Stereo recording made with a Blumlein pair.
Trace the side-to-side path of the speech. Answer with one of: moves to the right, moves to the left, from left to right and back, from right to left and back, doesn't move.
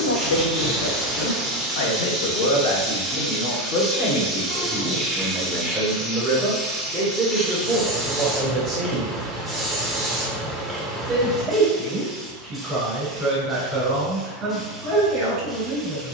moves to the right.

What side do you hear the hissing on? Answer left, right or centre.
centre.